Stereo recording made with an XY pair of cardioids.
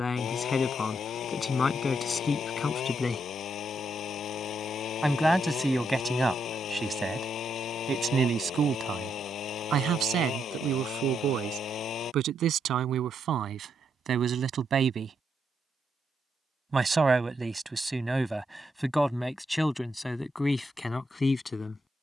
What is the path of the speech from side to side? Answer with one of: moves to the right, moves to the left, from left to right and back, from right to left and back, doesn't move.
from left to right and back.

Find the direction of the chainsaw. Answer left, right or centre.
left.